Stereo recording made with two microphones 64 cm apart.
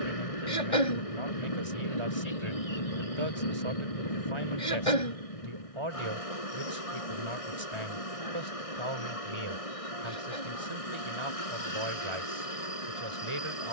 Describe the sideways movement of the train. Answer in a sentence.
You can hear the train stay put.